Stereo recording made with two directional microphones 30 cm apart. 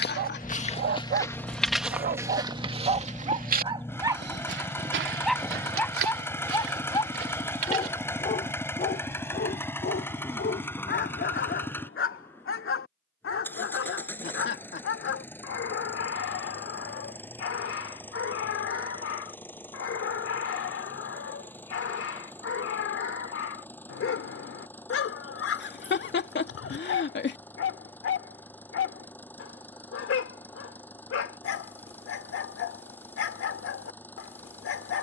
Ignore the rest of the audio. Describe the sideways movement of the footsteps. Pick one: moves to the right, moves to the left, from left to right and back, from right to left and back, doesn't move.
moves to the right.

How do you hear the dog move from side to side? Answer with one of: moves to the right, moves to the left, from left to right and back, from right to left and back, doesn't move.
moves to the left.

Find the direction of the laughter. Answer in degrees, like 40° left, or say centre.
40° left.